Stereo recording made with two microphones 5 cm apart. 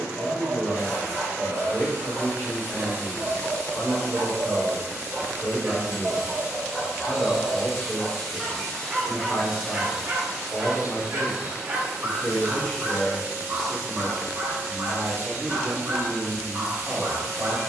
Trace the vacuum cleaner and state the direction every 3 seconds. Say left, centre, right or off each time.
right, right, centre, centre, right, right.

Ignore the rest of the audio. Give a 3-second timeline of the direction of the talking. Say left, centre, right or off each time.
left, left, left, left, centre, right.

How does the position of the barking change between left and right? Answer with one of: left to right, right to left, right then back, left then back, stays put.
left then back.